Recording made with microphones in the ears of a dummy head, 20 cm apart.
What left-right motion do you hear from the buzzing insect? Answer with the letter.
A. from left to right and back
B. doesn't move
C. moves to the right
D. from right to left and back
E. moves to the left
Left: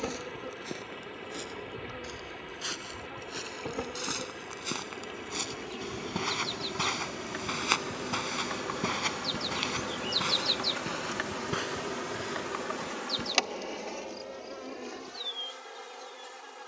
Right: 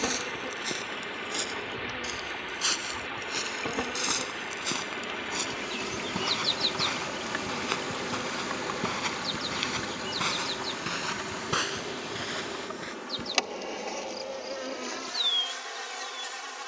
D.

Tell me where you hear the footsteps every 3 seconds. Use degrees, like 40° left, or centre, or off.
40° right, 20° right, 20° left, 20° right, 40° right, off.